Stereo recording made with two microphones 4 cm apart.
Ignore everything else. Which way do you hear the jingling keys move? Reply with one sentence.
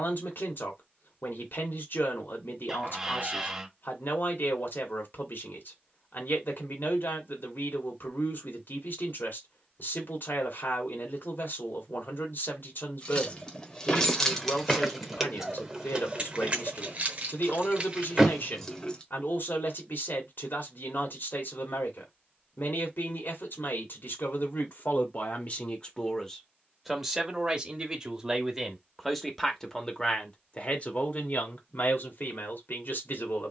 You can hear the jingling keys go right and come back.